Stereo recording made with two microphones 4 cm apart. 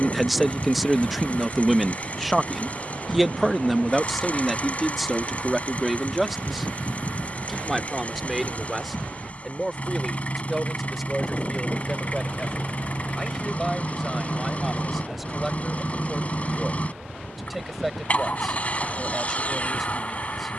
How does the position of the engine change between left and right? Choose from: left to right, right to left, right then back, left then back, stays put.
stays put.